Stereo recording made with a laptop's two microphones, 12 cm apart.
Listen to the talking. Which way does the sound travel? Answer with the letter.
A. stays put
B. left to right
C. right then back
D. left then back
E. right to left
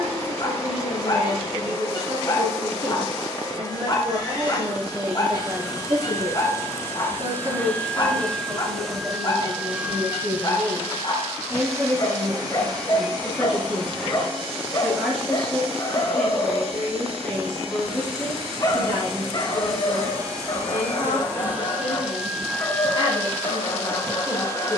E.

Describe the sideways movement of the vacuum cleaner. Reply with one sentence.
You can hear the vacuum cleaner move from left to right and back again.